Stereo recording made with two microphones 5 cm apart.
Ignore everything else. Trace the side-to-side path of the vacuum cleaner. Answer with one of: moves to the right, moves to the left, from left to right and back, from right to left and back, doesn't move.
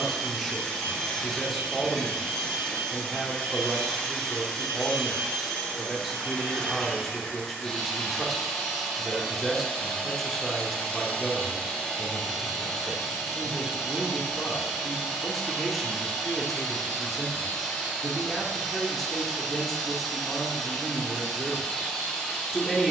doesn't move.